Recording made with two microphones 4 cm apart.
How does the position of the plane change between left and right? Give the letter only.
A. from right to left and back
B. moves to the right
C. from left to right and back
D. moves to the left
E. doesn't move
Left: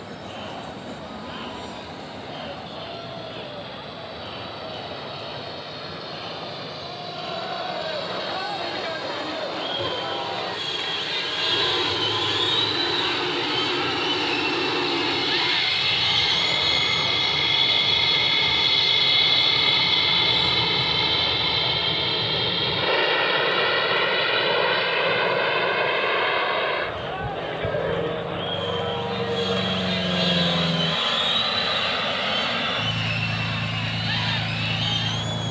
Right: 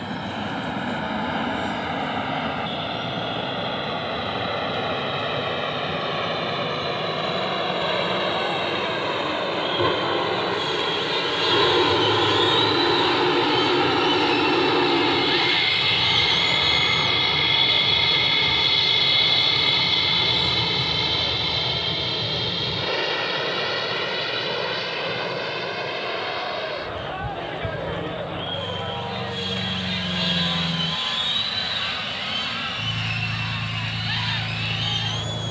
D.